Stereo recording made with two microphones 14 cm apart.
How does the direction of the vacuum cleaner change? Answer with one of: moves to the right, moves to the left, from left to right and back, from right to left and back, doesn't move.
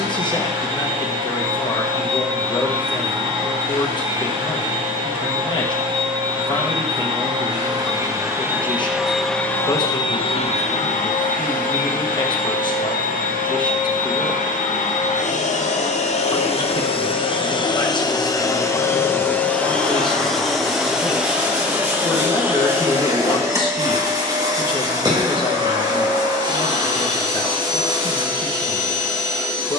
from right to left and back.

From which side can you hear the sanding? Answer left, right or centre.
right.